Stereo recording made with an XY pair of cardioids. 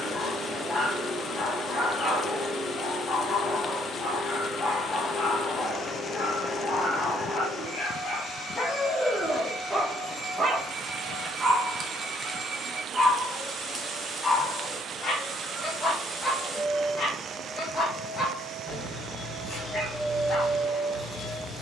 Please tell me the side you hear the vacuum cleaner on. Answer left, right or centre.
centre.